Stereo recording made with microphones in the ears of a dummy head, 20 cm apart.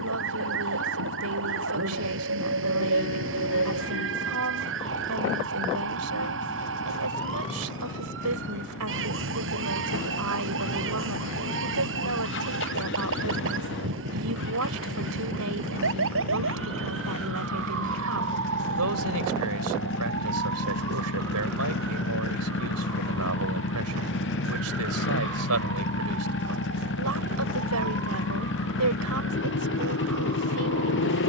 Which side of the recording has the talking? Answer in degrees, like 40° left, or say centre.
80° right.